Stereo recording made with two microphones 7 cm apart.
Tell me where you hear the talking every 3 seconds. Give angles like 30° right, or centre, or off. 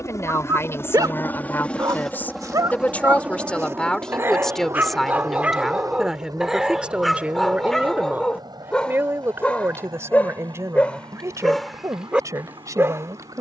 30° left, 10° left, 20° right, 40° right, 50° right.